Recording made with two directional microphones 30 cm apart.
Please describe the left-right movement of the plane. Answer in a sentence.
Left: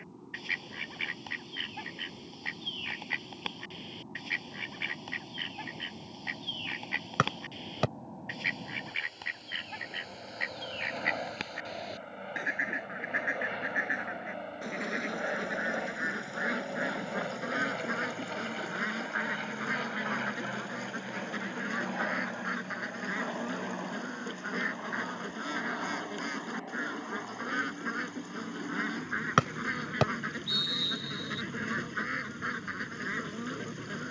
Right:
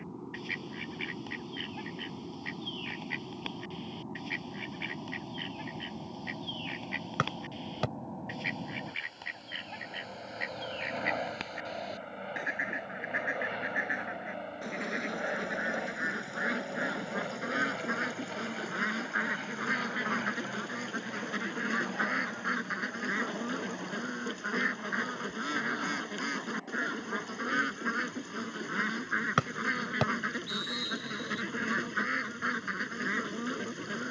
In this clip you hear the plane go from the right side to the left.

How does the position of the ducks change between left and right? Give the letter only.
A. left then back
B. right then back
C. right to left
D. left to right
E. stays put
D.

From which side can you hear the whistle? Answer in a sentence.
In this clip you hear the whistle on the left.